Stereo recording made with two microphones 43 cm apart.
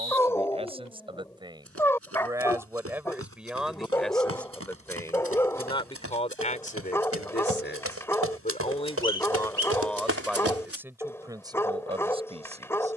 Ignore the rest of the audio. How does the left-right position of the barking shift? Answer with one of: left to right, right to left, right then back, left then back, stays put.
stays put.